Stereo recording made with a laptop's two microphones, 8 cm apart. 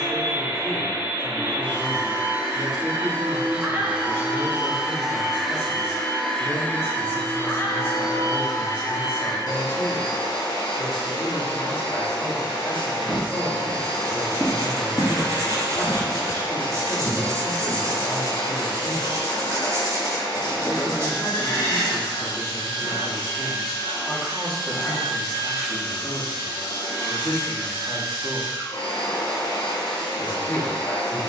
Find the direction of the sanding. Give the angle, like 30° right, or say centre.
40° right.